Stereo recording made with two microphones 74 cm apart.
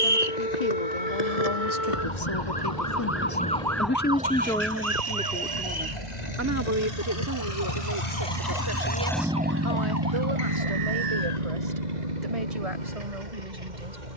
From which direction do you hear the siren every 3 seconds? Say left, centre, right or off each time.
left, centre, right, right, right.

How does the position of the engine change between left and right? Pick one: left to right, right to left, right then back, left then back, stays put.
left to right.